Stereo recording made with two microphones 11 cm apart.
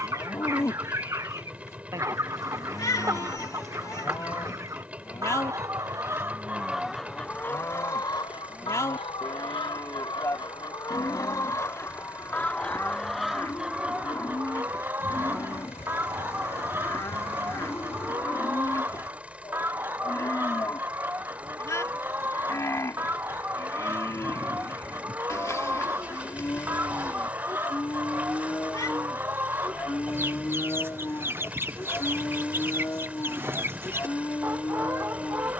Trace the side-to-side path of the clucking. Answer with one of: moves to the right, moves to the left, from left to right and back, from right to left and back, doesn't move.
from right to left and back.